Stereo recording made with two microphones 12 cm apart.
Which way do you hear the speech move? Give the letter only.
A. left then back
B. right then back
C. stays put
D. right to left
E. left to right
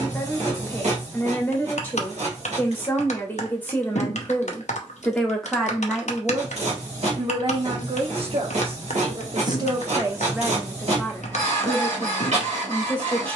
B.